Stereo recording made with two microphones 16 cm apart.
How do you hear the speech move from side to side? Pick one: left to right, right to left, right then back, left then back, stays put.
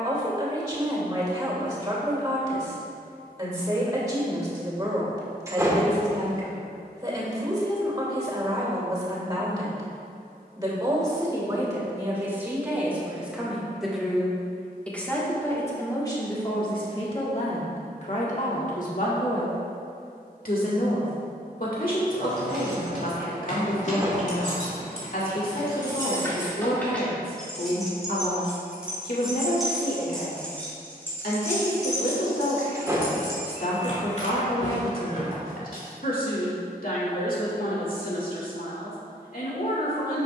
right to left.